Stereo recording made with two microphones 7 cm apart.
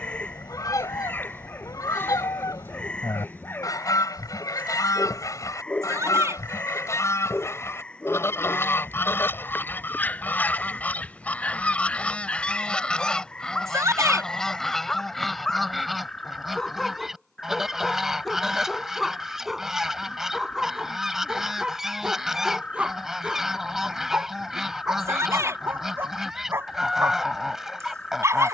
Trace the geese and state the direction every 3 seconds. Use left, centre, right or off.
left, left, left, left, centre, centre, centre, centre, centre, centre.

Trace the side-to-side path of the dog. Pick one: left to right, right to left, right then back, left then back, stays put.
left to right.